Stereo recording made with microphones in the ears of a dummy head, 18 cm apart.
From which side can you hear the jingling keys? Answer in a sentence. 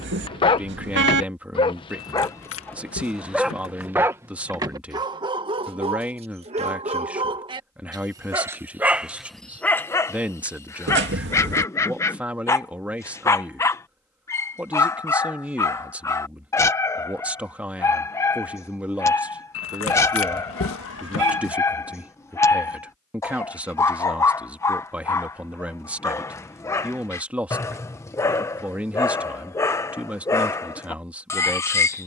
In this clip you hear the jingling keys on the left.